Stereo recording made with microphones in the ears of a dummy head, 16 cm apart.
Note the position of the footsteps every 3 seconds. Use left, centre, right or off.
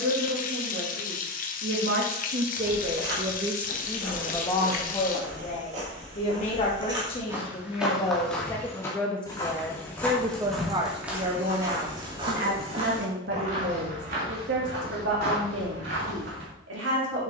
right, right, centre, centre, right, right.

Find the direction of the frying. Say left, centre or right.
left.